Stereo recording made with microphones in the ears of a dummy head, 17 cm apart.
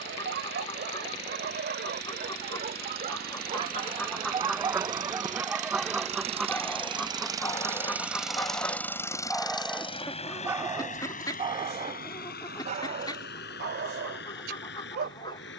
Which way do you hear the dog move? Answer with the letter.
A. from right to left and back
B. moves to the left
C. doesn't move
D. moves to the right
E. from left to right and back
A.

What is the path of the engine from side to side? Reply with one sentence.
In this clip you hear the engine go from the right side to the left.